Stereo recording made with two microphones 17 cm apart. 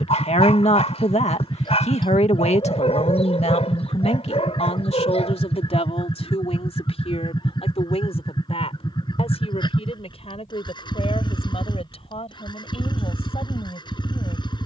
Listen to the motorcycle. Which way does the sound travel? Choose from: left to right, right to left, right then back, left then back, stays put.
stays put.